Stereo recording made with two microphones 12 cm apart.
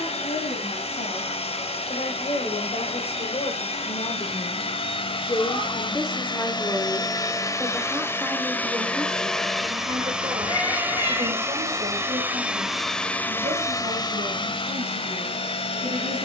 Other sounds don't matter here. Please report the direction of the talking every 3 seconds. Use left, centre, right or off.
left, left, centre, right, right, right.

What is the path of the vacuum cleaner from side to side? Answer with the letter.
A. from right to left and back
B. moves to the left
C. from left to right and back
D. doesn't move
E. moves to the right
C.